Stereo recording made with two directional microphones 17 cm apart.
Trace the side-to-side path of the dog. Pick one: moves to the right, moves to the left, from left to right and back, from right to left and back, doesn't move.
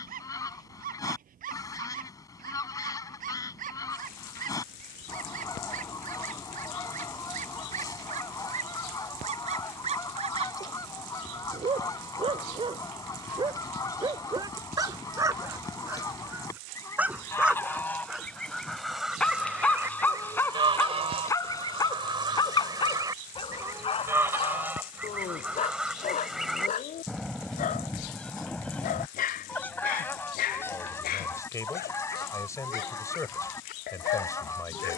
moves to the left.